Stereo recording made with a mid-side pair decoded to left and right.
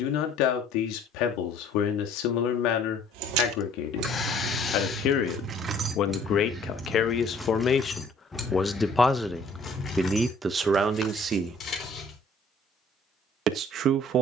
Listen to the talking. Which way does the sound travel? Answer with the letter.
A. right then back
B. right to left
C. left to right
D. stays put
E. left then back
C.